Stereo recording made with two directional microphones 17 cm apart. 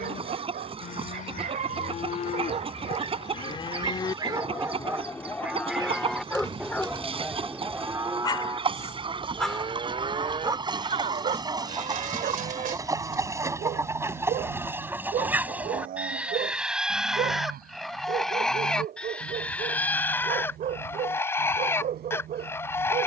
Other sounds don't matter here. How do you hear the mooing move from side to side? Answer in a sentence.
In this clip you hear the mooing go from the left side to the right.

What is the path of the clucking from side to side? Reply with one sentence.
In this clip you hear the clucking travel towards the left.